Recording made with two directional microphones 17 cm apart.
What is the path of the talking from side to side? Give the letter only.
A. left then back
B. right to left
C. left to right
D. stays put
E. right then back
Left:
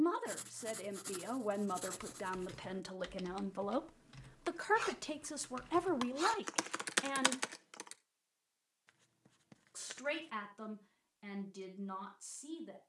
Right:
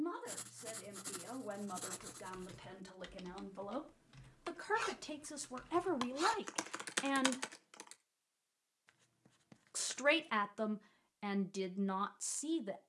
C.